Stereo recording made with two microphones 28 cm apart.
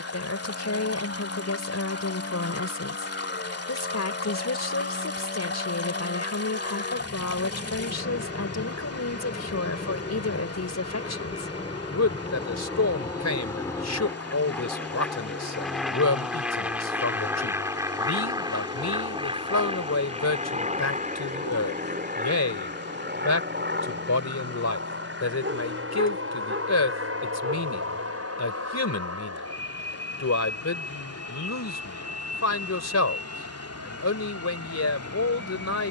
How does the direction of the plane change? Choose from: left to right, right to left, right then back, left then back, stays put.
left to right.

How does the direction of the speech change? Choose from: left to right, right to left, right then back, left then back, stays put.
stays put.